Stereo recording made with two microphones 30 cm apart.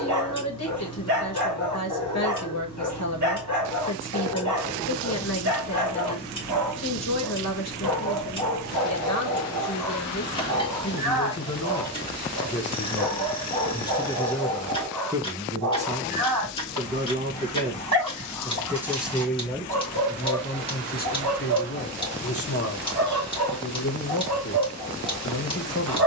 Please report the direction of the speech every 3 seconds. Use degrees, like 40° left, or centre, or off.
60° left, 60° left, 60° left, 60° left, 20° left, 20° right, 10° left, 50° left, 60° left.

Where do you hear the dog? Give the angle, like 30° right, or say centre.
70° right.